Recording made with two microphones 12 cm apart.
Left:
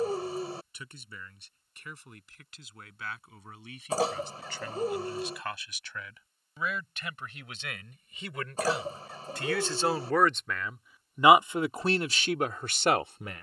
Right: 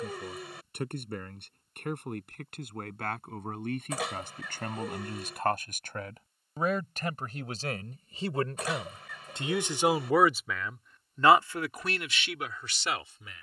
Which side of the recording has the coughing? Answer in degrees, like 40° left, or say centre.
30° left.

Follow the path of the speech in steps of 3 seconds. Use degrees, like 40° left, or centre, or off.
50° right, 50° right, 40° right, centre, 50° left.